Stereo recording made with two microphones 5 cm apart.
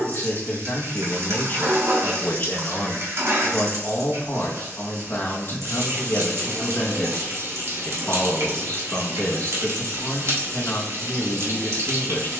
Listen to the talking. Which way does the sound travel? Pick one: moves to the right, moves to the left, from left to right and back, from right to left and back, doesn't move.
doesn't move.